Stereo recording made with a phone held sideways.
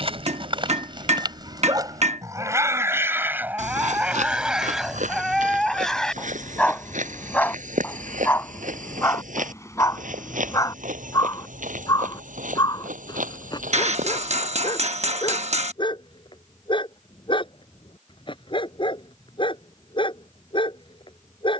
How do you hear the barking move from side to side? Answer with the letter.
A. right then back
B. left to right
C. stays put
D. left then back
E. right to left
E.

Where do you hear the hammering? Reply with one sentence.
In this clip you hear the hammering on the right.